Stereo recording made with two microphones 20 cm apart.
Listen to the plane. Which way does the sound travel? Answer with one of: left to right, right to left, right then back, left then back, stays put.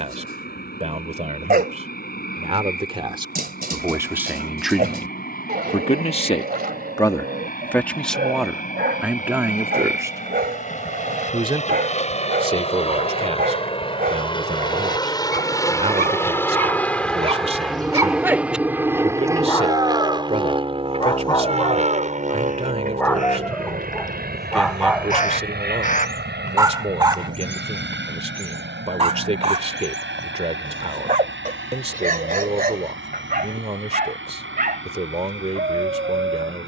left to right.